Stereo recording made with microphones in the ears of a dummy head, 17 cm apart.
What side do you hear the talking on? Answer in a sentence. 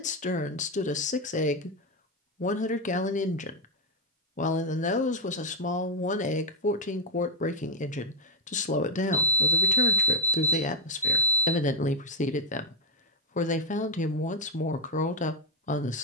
You can hear the talking on the left.